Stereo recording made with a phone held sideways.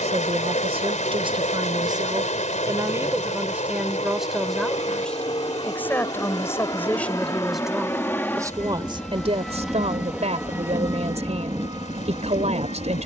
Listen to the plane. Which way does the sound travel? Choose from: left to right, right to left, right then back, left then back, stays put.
left to right.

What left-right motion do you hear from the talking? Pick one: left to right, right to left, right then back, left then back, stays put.
left then back.